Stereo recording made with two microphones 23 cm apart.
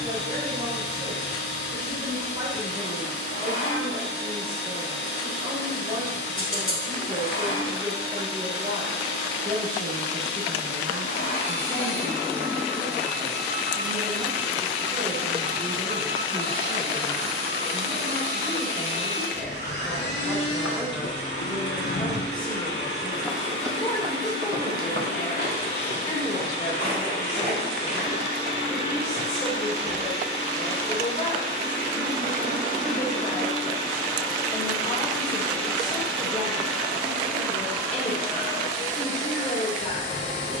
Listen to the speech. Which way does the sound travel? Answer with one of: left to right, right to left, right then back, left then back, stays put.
right to left.